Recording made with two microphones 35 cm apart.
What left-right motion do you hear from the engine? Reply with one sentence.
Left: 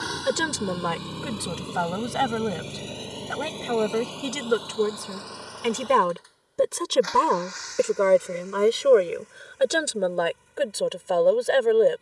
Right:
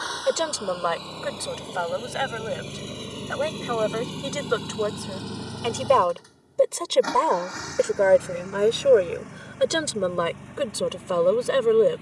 In this clip you hear the engine move from left to right.